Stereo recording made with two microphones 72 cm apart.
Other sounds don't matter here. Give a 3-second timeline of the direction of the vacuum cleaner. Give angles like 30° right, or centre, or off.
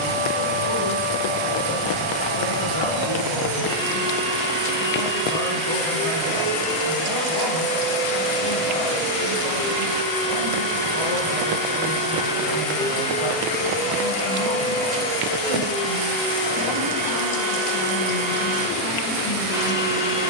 20° right, 20° right, 20° right, 10° right, 10° left, 30° left, centre.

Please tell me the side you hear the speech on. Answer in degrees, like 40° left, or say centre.
30° left.